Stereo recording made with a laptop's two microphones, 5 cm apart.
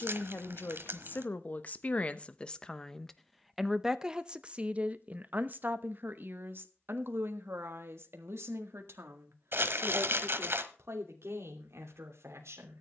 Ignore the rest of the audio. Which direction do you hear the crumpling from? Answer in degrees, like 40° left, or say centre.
60° right.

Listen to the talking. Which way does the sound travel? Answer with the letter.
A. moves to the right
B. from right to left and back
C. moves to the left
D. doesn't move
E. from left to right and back
A.